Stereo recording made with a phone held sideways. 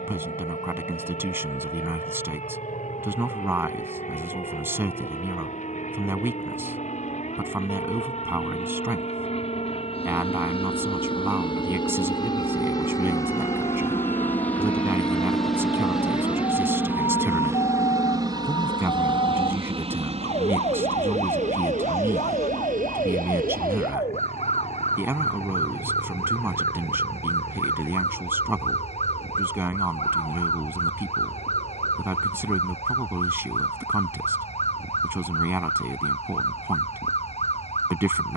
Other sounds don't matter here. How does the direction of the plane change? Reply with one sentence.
You can hear the plane move from left to right.